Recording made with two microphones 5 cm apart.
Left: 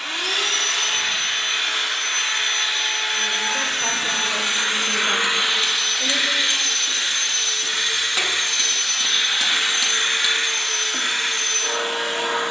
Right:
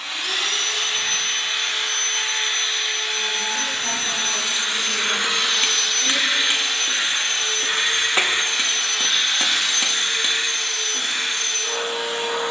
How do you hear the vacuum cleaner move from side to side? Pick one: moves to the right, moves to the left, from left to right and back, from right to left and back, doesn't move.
from left to right and back.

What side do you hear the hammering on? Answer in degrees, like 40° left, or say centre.
30° right.